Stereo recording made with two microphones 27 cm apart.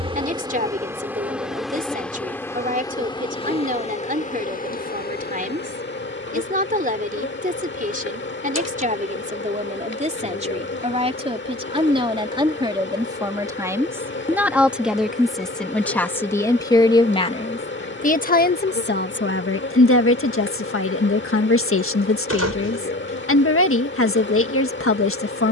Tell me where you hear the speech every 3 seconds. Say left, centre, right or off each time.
right, right, right, right, centre, centre, left, left, left.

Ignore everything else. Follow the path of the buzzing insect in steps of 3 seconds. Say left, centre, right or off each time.
centre, left, left, left, left, left, left, left, left.